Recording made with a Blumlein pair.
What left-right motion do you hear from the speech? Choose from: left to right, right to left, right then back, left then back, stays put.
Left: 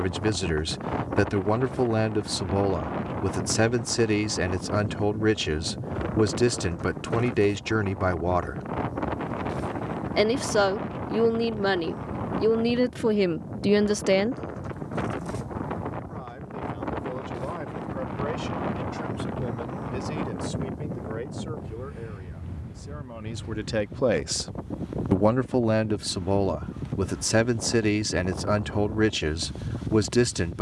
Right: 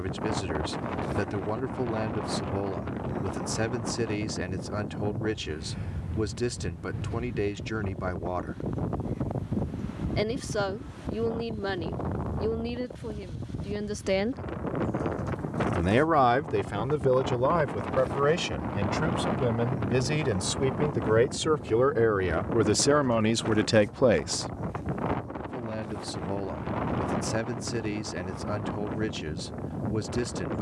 right then back.